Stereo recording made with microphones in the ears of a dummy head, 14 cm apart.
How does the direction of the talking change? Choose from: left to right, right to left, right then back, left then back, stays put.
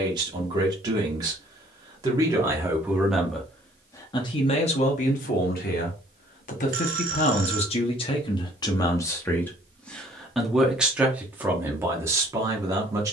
left then back.